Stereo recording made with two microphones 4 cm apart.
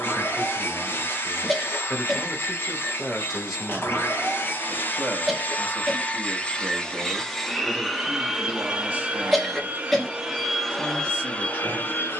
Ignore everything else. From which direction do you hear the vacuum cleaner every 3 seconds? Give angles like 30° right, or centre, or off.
50° left, 40° left, centre, centre.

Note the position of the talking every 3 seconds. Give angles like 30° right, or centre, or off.
30° left, 20° right, 30° right, 30° right.